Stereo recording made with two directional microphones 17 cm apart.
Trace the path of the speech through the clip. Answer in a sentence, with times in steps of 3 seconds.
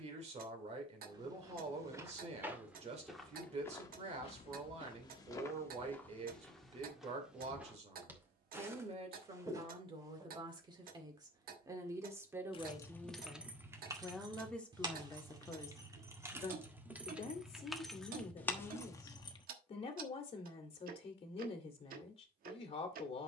In this clip you hear the speech on the right from 0 s, in the centre from 12 s and on the left from 15 s.